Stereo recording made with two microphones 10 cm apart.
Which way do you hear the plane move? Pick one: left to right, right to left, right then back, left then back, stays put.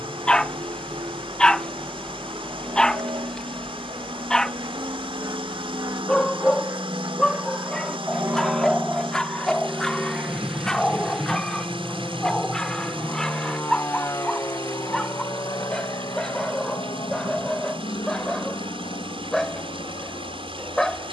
right to left.